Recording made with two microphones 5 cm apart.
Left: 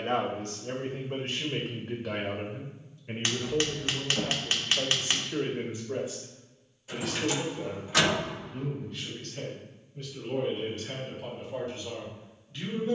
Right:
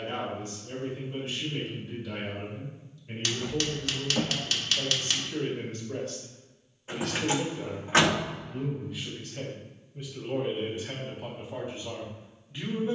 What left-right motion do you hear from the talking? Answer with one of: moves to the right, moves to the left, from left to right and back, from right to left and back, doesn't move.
moves to the right.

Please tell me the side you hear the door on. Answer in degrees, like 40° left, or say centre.
40° right.